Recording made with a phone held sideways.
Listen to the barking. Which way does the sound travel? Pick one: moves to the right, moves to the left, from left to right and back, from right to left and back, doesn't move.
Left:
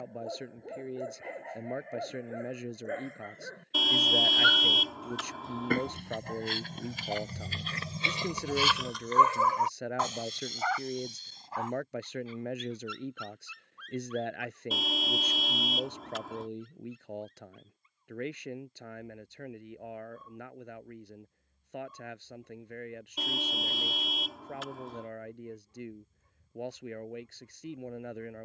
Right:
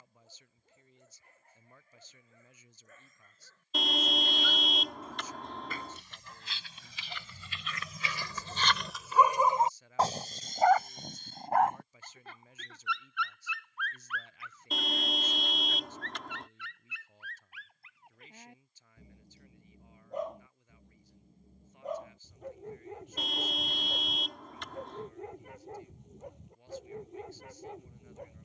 moves to the right.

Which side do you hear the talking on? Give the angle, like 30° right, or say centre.
80° left.